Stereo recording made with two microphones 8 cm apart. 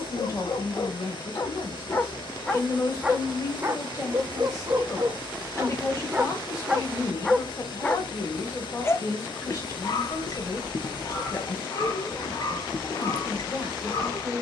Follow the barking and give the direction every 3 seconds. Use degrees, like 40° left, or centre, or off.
40° left, 30° right, 10° left, 50° left, 50° left.